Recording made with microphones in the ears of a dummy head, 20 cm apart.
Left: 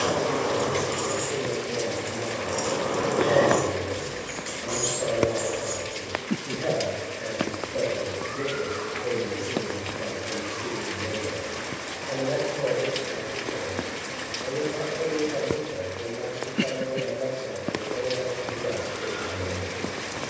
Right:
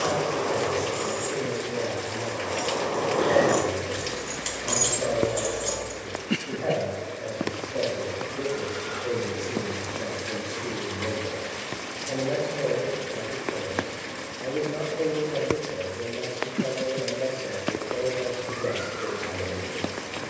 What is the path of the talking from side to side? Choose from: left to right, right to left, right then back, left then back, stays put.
left to right.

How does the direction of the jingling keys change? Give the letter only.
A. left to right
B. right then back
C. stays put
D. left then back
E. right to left
A.